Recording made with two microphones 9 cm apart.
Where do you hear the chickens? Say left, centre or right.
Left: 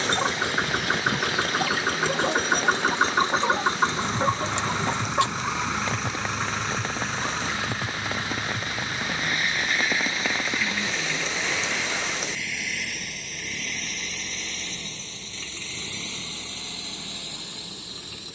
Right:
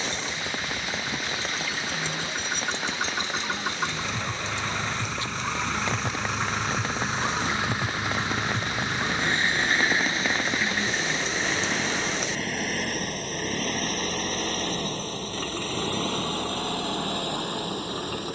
left.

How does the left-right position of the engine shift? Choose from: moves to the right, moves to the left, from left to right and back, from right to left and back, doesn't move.
moves to the right.